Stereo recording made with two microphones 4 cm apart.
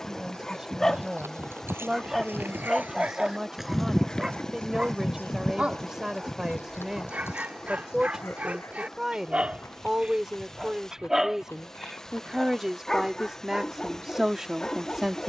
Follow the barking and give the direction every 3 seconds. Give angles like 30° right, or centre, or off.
10° left, 20° right, 30° right, 20° right, 20° left.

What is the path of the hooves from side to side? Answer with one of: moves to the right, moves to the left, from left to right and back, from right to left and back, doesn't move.
moves to the left.